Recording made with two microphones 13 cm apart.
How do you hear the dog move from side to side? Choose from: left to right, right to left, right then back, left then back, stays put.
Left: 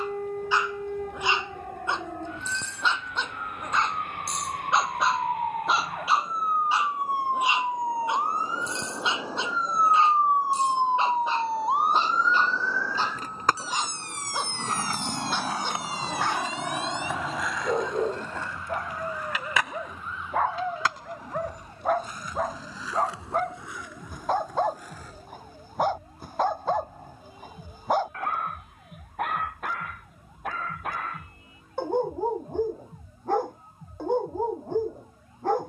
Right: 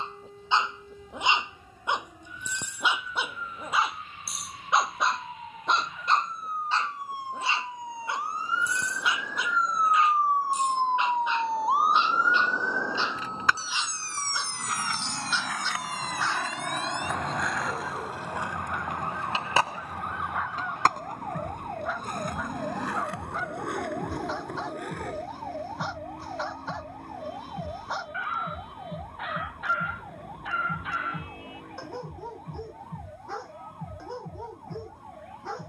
right to left.